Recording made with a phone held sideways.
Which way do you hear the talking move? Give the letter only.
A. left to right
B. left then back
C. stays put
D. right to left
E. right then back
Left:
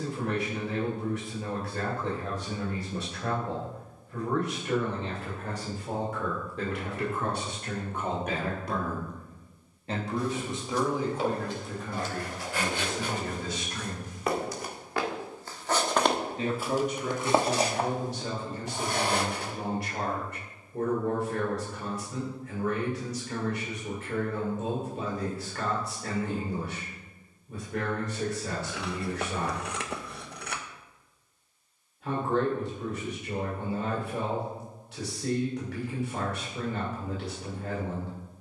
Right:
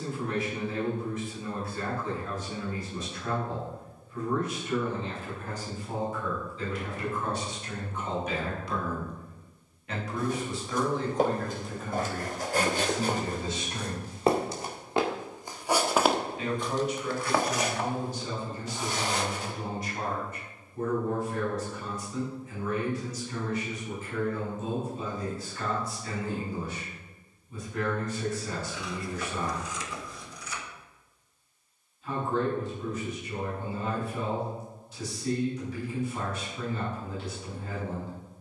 E.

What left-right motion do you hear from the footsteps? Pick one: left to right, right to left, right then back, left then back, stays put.
right to left.